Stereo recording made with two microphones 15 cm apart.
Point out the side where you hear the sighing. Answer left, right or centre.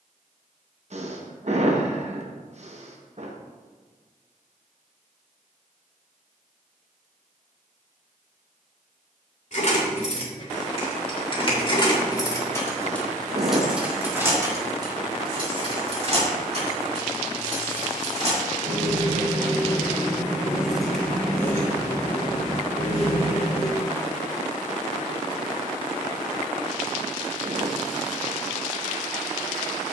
right.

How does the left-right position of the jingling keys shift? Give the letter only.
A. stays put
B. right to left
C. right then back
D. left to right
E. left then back
C.